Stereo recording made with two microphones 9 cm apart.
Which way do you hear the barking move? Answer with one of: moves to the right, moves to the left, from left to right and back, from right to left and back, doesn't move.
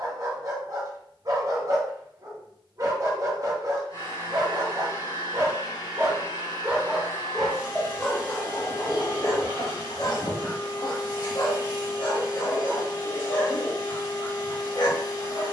moves to the left.